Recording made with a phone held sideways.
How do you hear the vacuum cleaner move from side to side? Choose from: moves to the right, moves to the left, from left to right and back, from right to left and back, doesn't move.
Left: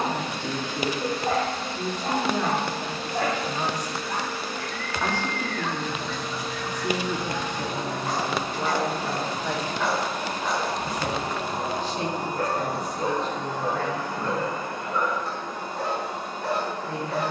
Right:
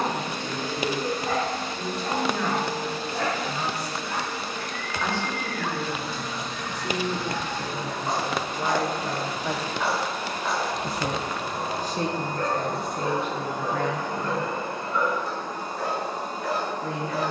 from right to left and back.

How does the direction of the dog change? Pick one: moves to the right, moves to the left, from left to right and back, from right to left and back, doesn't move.
from left to right and back.